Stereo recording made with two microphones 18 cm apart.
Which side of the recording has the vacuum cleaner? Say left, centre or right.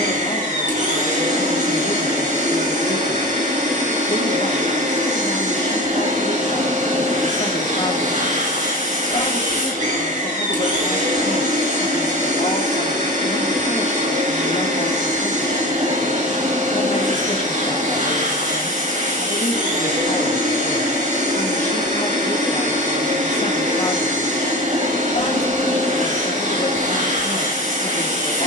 right.